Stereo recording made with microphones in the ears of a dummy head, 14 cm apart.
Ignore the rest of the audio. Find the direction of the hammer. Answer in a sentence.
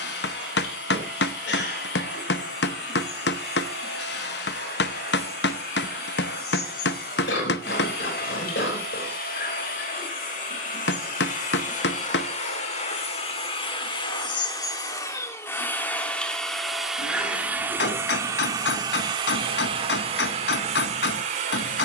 In this clip you hear the hammer on the left.